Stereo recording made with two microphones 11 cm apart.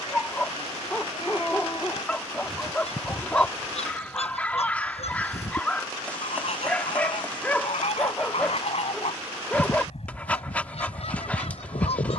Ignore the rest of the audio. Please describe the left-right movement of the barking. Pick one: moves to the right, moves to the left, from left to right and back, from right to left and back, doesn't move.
doesn't move.